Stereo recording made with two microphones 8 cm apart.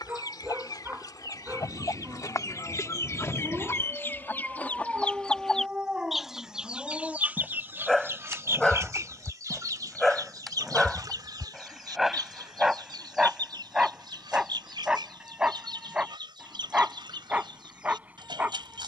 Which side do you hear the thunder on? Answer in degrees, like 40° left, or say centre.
90° right.